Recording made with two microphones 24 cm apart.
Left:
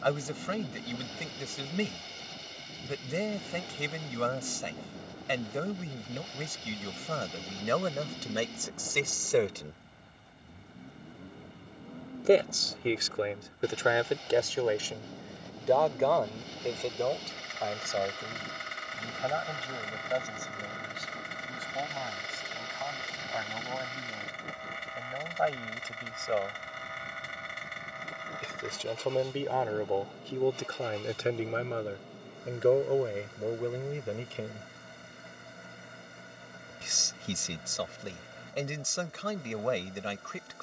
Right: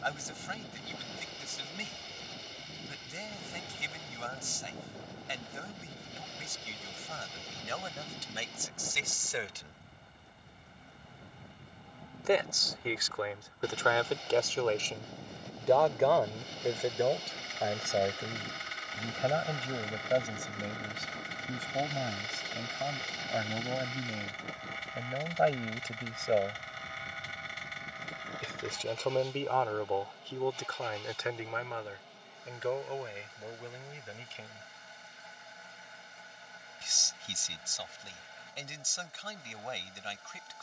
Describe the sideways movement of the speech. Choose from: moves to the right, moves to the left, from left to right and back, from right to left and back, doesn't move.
from left to right and back.